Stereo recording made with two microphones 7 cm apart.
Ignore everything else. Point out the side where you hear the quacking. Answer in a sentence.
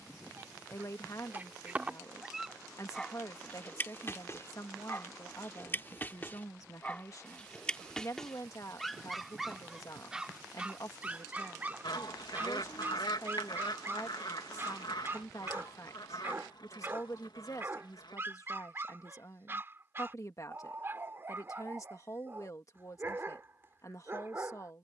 In this clip you hear the quacking on the left.